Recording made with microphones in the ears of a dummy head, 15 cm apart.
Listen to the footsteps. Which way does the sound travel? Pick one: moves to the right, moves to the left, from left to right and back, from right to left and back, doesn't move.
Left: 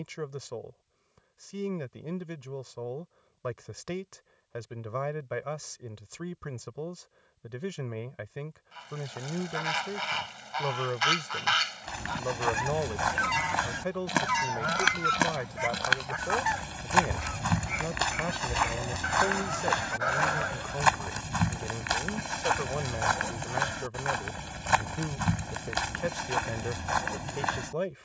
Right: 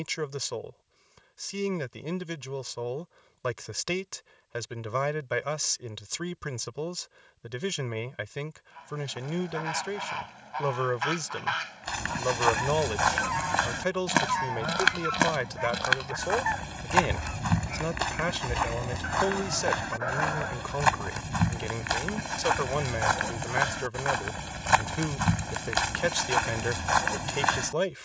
from right to left and back.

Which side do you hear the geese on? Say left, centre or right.
left.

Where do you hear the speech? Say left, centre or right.
right.